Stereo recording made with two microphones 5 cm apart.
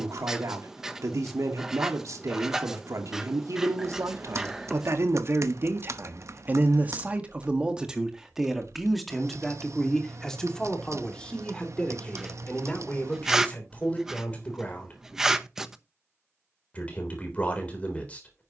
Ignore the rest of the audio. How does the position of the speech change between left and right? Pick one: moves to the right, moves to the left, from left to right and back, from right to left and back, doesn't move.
moves to the left.